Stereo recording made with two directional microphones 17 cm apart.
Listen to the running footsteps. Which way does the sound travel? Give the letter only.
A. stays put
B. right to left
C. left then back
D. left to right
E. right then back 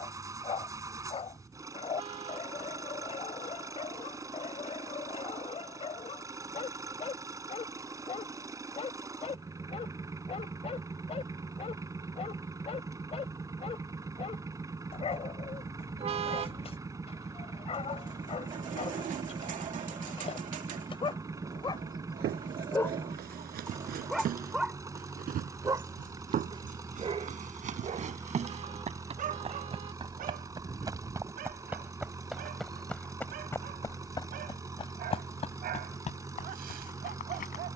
B.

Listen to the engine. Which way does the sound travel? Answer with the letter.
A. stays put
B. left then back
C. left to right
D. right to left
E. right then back
A.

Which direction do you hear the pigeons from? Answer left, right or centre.
right.